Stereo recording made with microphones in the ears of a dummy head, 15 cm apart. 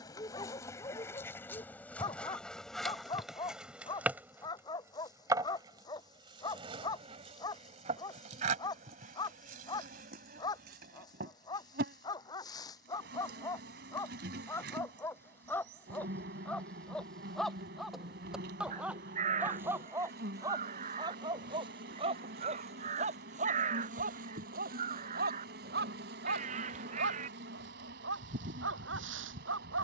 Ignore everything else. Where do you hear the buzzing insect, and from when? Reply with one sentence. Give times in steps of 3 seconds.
In this clip you hear the buzzing insect in the centre from 0 s and on the right from 6 s.